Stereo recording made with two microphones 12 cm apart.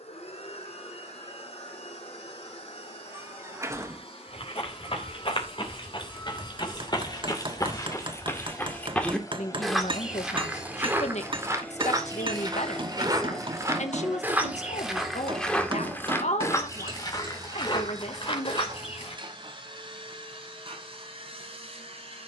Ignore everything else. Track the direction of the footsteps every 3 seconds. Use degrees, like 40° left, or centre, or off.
off, 50° left, 30° left, 10° right, 20° right, 20° left, 50° left, off.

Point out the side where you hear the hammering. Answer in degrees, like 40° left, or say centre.
50° right.